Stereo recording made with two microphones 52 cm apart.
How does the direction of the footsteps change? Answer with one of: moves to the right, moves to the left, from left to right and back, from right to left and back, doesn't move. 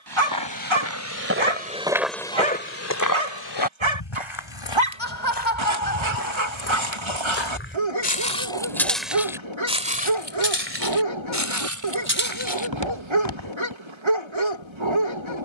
from right to left and back.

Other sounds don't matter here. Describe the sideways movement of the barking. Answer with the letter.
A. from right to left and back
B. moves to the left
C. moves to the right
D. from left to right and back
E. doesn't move
E.